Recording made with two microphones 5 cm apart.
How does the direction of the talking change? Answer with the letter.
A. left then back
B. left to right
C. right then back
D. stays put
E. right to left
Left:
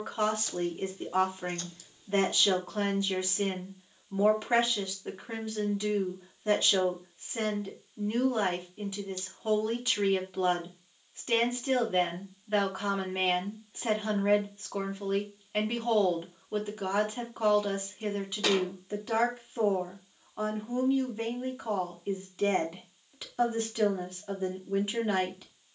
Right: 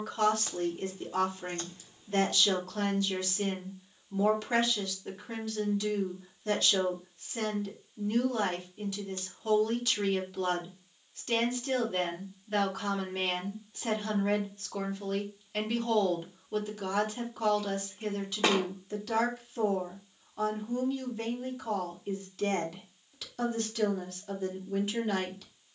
D.